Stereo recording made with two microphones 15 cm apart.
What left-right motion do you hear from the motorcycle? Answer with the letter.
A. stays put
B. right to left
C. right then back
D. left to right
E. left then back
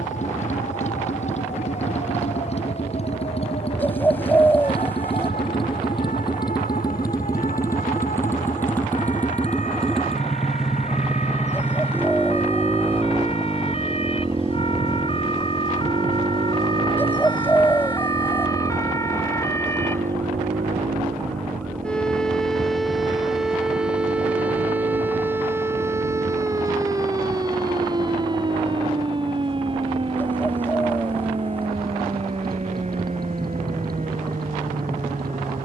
D.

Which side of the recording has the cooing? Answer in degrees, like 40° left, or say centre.
10° left.